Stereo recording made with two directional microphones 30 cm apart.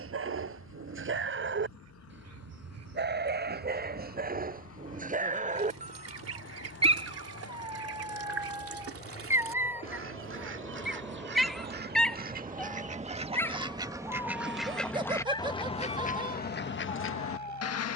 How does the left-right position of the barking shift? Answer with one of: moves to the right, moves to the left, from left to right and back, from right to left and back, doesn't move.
moves to the left.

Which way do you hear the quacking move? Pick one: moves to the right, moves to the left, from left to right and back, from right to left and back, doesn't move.
moves to the left.